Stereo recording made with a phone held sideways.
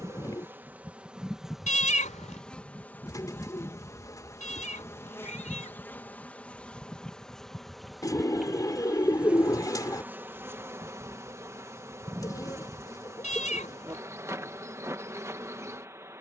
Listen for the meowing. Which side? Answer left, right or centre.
left.